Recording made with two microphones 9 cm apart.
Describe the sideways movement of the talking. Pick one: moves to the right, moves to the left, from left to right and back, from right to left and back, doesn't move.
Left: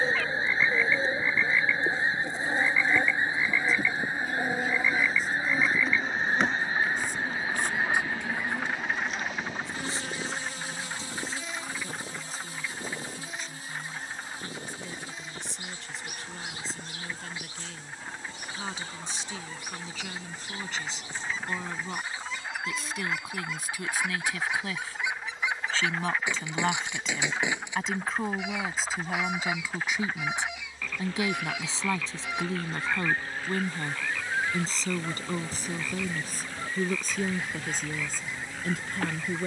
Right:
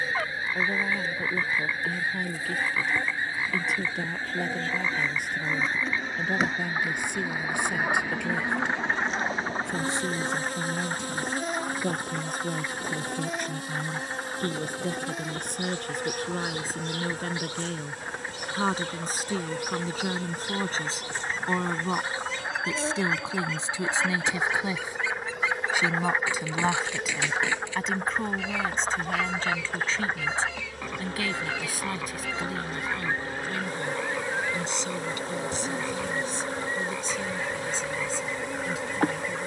moves to the left.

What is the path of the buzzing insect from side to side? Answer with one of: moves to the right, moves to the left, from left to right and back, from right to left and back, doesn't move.
moves to the right.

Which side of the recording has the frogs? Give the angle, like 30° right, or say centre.
30° right.